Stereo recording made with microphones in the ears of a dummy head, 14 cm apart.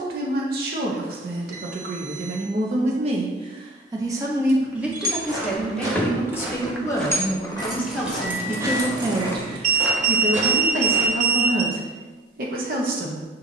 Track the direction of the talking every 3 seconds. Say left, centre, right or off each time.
right, centre, centre, right, right.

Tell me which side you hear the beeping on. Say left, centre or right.
right.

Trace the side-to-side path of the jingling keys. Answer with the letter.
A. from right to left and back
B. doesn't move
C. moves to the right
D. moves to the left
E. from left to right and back
A.